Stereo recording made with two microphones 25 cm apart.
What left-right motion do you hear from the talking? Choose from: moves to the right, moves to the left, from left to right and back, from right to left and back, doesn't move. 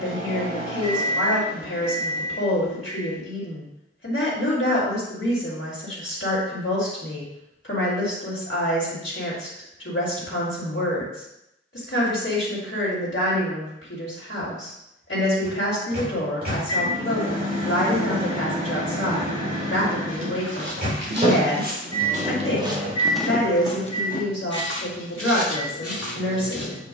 doesn't move.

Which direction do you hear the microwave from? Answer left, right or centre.
right.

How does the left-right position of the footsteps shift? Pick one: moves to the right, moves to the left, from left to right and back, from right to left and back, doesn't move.
moves to the left.